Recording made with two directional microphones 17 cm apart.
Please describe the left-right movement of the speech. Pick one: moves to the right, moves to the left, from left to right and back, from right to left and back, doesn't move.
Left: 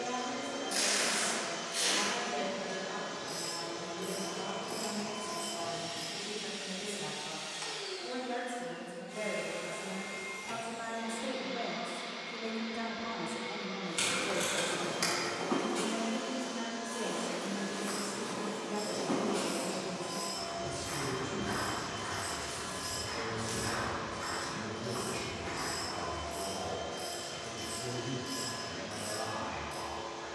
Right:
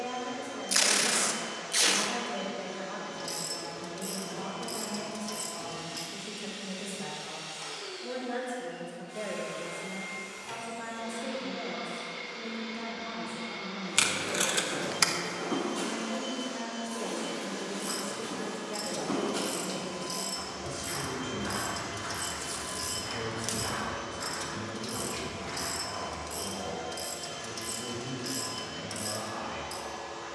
from right to left and back.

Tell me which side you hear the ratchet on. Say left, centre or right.
right.